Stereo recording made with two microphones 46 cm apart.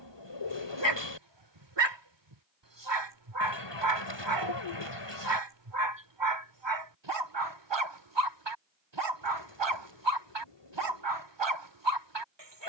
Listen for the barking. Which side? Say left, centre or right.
right.